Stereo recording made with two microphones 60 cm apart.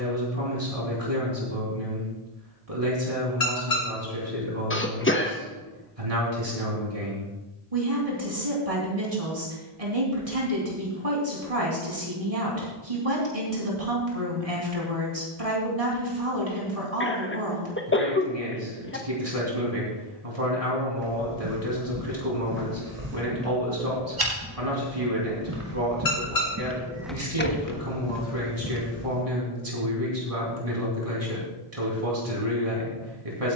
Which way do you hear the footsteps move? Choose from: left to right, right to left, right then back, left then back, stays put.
right to left.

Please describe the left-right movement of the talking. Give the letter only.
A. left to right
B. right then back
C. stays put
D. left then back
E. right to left
C.